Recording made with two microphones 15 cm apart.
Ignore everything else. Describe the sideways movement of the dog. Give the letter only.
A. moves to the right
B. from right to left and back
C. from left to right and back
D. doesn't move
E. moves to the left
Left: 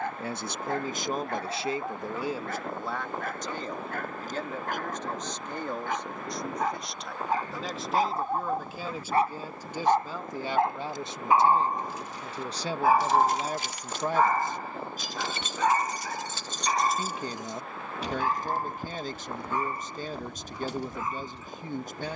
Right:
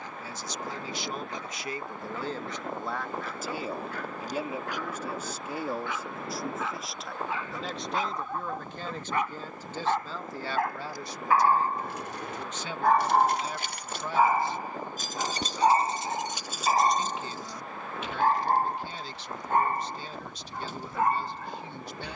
A.